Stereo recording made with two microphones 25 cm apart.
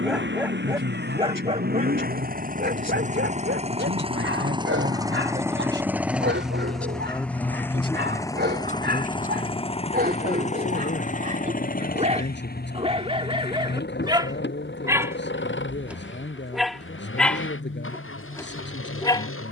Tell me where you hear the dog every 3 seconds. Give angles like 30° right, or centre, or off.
20° right, 50° right, 50° right, 40° right, 20° right, centre, 10° left.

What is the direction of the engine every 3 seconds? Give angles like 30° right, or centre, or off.
40° right, 20° right, 10° left, 30° left, 40° left, 50° left, 60° left.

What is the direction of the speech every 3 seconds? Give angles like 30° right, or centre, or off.
50° right, 40° right, 10° left, 40° left, 50° left, 50° left, 50° left.